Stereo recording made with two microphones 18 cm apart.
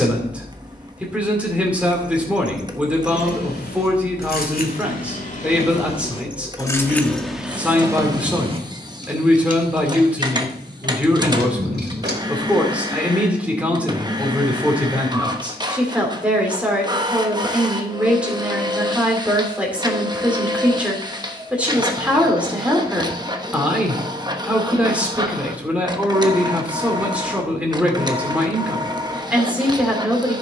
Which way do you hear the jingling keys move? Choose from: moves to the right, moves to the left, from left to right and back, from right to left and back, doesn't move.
moves to the right.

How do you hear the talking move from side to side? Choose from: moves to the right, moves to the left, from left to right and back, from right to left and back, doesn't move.
doesn't move.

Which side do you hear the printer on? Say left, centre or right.
right.